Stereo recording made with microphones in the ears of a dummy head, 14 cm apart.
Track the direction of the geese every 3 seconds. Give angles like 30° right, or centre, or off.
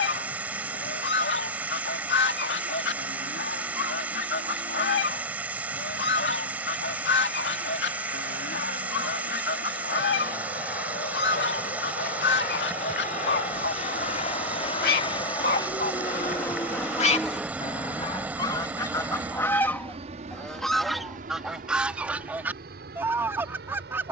80° left, 80° left, 80° left, 80° left, 70° left, 50° left, 20° left, 10° right.